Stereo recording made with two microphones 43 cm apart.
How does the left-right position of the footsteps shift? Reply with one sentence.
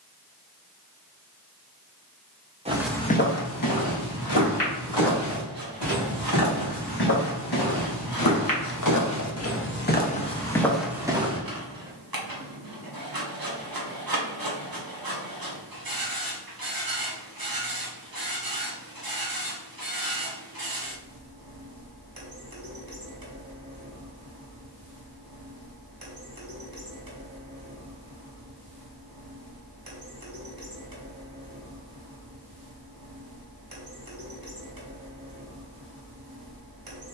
You can hear the footsteps move from right to left and back again.